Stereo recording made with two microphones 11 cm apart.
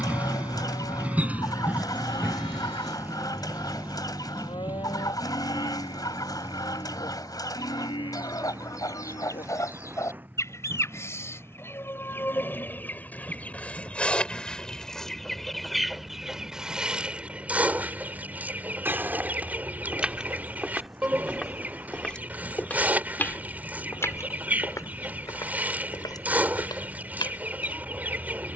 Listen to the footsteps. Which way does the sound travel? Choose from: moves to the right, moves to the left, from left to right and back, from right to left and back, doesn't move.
moves to the left.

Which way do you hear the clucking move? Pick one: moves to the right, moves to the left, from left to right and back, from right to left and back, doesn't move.
moves to the right.